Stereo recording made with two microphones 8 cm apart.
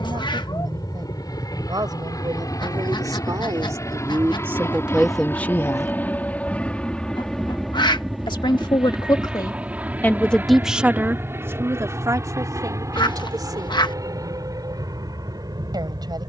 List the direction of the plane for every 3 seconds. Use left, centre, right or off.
left, left, centre, right, right, right.